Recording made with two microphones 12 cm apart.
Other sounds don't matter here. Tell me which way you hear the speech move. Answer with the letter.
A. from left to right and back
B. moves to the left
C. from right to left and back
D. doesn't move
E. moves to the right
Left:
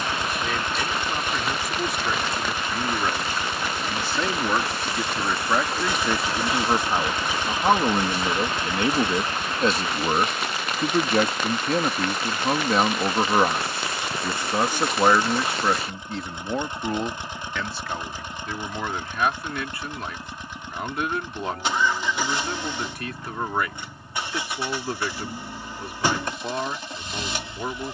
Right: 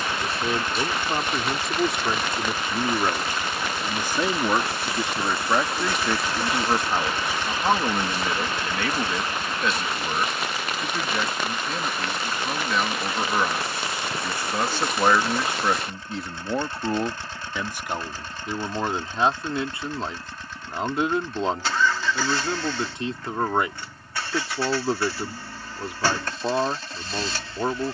C.